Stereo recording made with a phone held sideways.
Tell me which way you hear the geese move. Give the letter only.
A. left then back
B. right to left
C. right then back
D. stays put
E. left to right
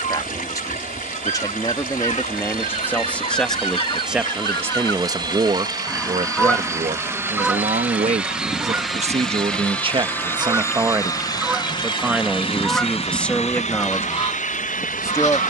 C.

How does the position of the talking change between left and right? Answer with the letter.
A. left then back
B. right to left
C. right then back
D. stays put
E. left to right
C.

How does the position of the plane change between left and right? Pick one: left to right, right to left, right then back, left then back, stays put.
right to left.